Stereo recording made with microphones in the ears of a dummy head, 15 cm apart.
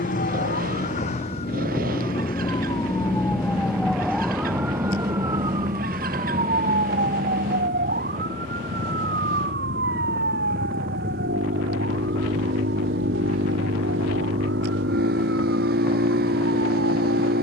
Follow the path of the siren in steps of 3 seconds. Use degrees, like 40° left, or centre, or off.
40° left, 10° right, 50° right, 60° right, 70° right, 70° right.